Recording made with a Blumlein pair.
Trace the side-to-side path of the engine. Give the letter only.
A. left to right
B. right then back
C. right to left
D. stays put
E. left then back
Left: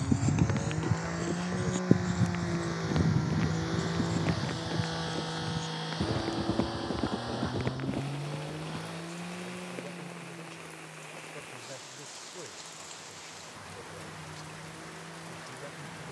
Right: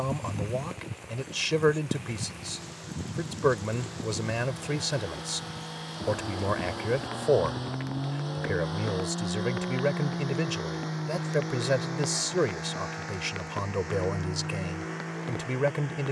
A.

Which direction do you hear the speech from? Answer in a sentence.
You can hear the speech on the right.